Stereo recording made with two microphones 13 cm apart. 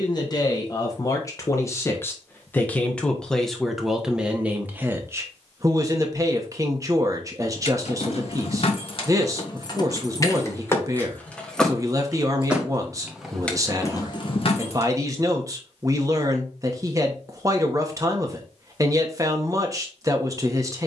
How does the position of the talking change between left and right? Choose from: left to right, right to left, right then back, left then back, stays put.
left to right.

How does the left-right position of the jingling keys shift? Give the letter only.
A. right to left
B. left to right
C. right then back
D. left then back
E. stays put
C.